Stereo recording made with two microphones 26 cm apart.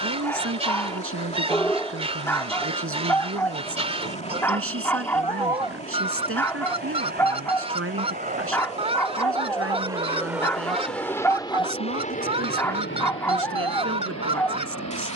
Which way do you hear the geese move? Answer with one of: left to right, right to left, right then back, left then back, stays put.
stays put.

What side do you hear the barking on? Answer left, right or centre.
centre.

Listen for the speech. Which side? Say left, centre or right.
right.